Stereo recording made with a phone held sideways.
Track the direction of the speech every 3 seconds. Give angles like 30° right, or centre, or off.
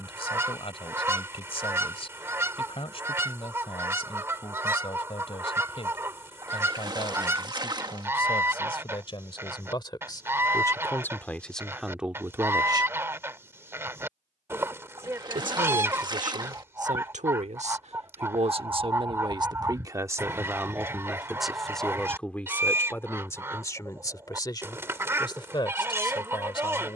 40° left, 40° left, 40° left, 20° left, 20° right, 60° right, 30° right, 10° left, 30° left.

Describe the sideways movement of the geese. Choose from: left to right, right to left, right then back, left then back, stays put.
stays put.